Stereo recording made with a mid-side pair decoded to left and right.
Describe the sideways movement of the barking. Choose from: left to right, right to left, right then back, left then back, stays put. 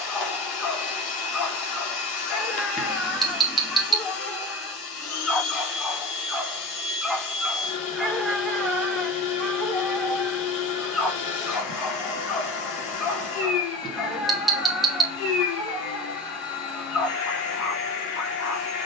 right then back.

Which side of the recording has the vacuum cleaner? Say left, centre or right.
left.